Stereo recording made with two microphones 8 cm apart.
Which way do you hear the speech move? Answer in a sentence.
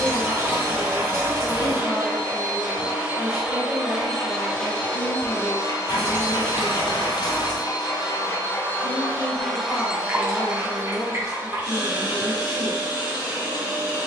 You can hear the speech stay put.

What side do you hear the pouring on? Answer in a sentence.
You can hear the pouring on the right.